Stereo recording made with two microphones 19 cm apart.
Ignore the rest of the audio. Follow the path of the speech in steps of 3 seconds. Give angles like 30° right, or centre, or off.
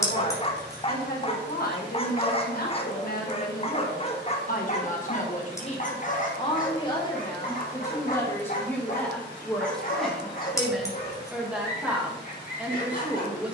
50° left, 50° left, 20° left, centre, 10° right.